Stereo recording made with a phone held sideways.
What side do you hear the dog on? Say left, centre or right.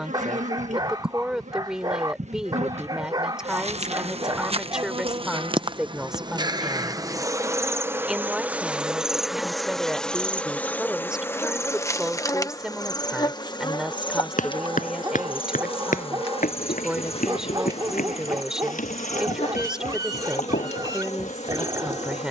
right.